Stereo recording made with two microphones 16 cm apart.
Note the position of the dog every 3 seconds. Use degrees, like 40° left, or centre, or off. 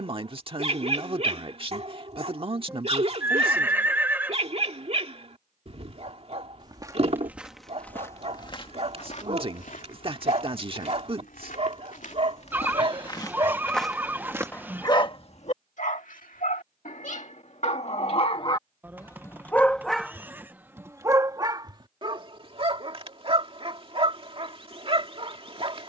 40° right, 40° right, 40° right, 40° right, 10° right, 50° left, 10° left, 30° right, 40° right.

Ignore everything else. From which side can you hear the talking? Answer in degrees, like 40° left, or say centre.
40° right.